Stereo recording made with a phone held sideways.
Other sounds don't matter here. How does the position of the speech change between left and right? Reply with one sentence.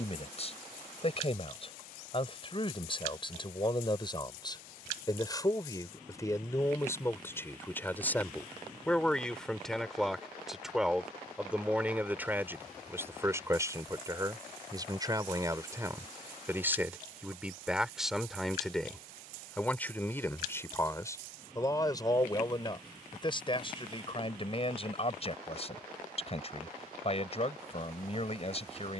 You can hear the speech move from left to right and back again.